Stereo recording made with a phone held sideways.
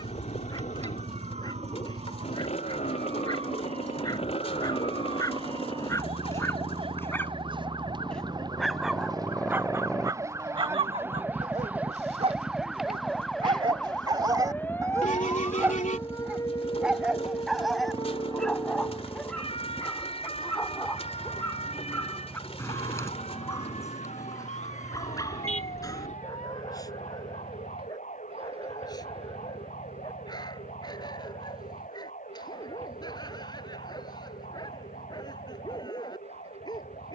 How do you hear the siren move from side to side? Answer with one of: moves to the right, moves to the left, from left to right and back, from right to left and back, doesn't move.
moves to the left.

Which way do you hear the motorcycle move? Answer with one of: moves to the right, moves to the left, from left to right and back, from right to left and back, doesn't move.
moves to the right.